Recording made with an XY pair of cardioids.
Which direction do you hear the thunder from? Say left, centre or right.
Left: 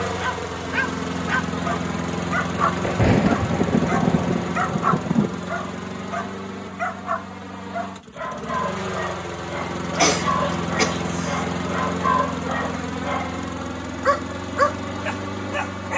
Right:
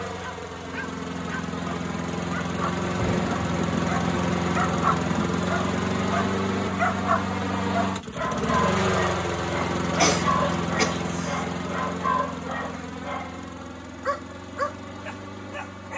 left.